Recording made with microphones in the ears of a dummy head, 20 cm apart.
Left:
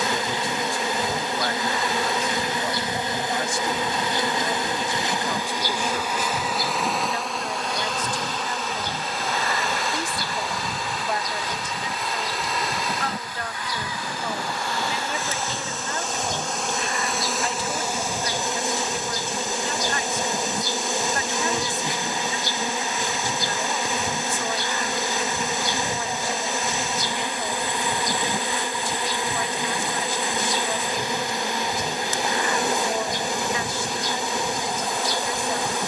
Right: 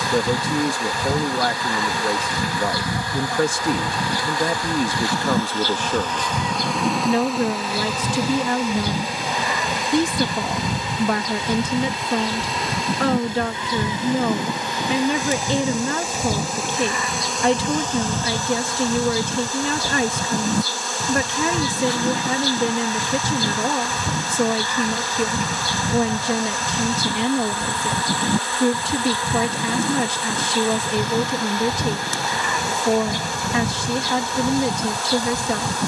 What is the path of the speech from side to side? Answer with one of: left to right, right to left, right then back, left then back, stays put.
stays put.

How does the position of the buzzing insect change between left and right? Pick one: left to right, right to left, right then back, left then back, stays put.
right then back.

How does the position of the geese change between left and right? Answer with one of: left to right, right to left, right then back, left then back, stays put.
stays put.